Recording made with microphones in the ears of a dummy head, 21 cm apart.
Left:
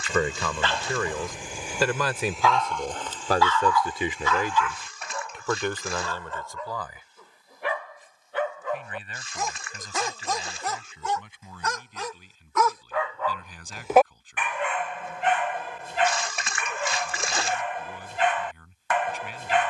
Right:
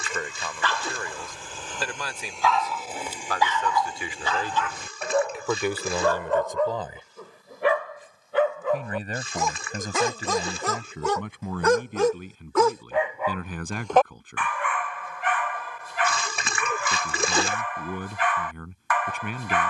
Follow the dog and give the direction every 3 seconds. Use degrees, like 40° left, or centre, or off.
10° left, 30° right, 60° right, 60° right, centre, 20° left, 20° left.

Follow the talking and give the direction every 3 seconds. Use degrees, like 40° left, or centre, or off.
60° left, 10° left, 20° right, 40° right, 50° right, 50° right, 50° right.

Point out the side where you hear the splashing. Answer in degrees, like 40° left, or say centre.
70° right.